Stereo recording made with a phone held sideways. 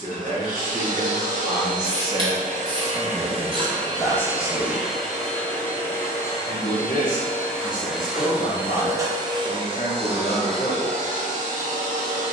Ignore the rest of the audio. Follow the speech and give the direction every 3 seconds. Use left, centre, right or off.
right, centre, left, left.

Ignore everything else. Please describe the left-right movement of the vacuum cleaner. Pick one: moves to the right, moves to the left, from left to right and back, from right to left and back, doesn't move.
from right to left and back.